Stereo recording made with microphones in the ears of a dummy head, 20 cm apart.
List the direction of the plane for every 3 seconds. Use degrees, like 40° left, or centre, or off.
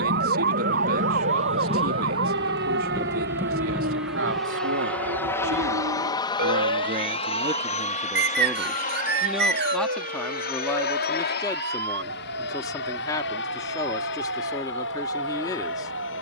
30° right, centre, 30° left, 40° left, 50° left, 50° left.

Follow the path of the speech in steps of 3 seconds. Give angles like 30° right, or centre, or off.
70° right, 60° right, 20° right, 10° left, 20° left, 20° left.